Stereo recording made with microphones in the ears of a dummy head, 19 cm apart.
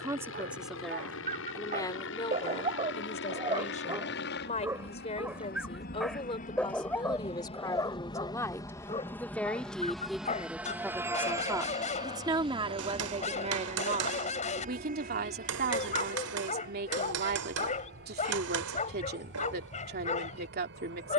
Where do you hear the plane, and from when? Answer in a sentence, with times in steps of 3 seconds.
In this clip you hear the plane on the left from 0 s, in the centre from 9 s and on the right from 12 s.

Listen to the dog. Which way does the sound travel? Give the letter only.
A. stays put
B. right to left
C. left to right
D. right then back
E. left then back
B.